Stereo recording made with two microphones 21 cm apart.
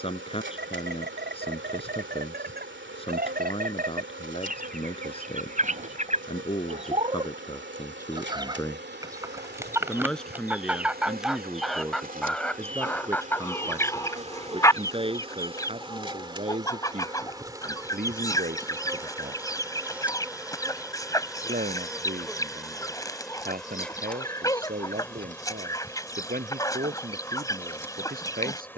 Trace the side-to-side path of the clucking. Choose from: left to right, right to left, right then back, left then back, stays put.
right to left.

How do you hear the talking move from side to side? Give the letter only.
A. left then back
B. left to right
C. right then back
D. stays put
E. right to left
B.